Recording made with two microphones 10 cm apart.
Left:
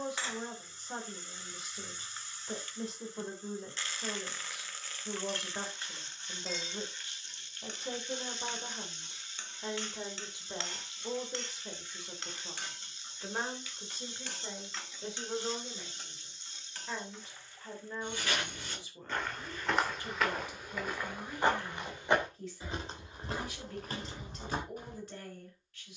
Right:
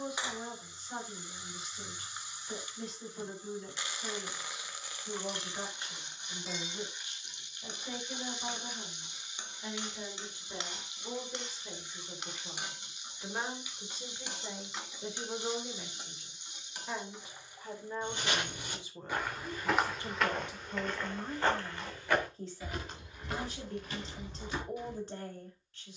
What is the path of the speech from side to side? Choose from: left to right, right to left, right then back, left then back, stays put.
left to right.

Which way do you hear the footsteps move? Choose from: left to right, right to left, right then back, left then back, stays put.
right to left.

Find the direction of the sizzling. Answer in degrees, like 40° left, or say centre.
20° right.